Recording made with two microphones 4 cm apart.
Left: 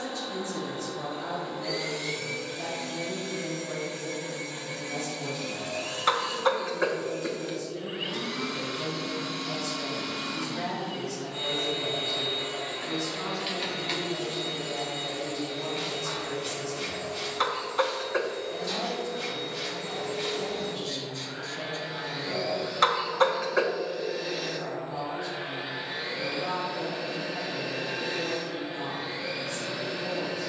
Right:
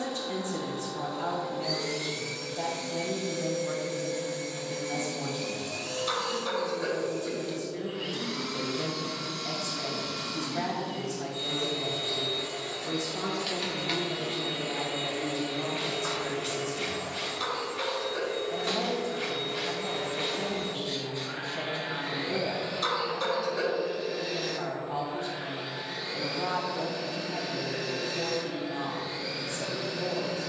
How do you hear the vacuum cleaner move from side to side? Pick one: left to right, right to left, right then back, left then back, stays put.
right then back.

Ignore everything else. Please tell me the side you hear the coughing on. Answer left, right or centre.
left.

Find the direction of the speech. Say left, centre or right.
right.